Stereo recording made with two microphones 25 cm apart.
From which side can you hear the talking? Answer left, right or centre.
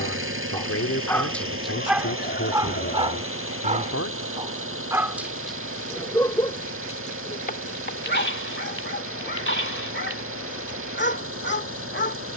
left.